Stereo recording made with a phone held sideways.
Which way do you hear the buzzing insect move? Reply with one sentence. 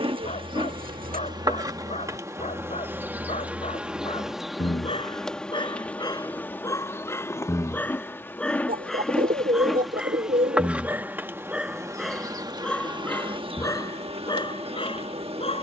You can hear the buzzing insect move from right to left and back again.